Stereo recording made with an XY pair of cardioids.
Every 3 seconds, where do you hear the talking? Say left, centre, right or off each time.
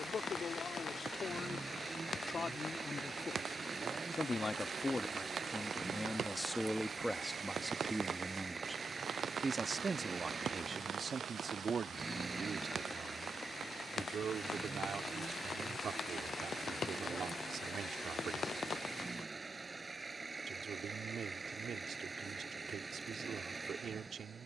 left, left, centre, right, right, right, right, right.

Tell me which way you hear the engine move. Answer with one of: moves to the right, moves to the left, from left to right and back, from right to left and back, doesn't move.
doesn't move.